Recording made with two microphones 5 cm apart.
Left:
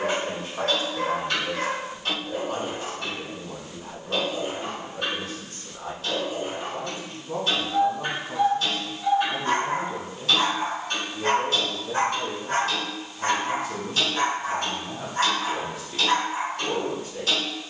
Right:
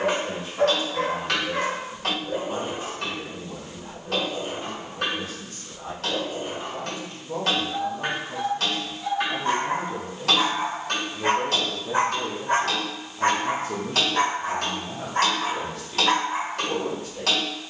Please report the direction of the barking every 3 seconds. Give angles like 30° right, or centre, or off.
40° right, 10° left, 10° left, 10° right, 40° right, 50° right.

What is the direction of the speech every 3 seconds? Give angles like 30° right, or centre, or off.
40° left, 40° left, 30° left, 10° right, 30° right, 20° left.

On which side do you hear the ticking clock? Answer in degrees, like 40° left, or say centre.
80° right.